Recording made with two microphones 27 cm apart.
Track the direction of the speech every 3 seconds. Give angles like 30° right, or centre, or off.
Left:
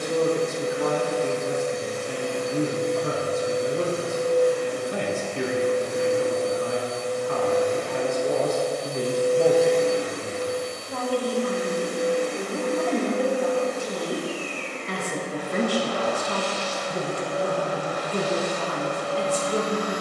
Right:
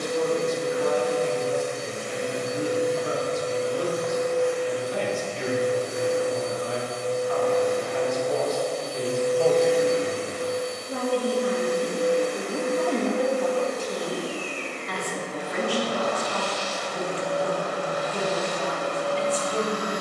60° left, 60° left, 60° left, 10° right, 10° left, 50° left, 50° left.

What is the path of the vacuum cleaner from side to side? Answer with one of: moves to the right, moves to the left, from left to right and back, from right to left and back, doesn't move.
from right to left and back.